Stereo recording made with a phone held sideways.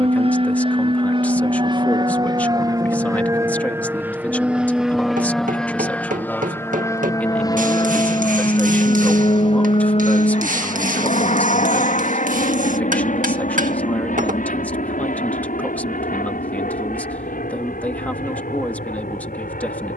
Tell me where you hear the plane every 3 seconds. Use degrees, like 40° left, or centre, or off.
40° right, 10° right, 30° left, 50° left, 60° left, 70° left, 70° left.